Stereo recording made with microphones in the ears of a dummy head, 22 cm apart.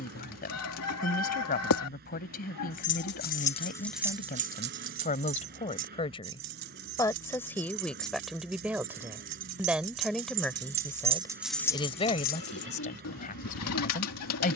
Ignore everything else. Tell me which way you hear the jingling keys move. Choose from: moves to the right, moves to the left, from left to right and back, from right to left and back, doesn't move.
from left to right and back.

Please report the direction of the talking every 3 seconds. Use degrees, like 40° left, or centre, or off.
40° left, 30° left, 10° left, centre, 30° left.